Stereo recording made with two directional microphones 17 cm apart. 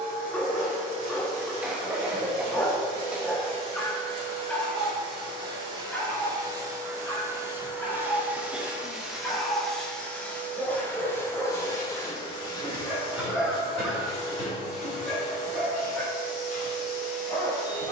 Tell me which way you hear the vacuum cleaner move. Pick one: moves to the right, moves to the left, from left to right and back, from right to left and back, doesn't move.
moves to the left.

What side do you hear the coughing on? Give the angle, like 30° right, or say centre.
10° right.